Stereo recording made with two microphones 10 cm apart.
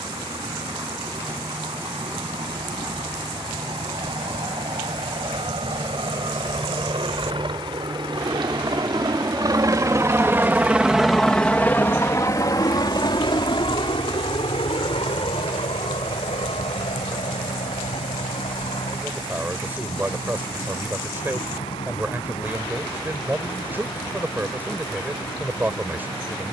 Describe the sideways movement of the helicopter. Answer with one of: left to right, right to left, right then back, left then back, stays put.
right to left.